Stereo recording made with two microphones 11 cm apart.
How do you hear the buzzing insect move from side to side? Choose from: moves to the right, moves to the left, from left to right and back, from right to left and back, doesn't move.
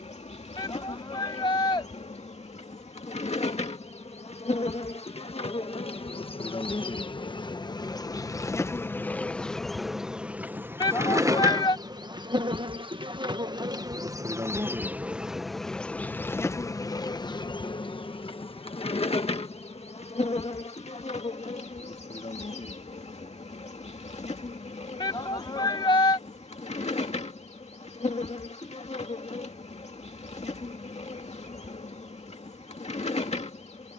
from left to right and back.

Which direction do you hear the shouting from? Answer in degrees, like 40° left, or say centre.
40° left.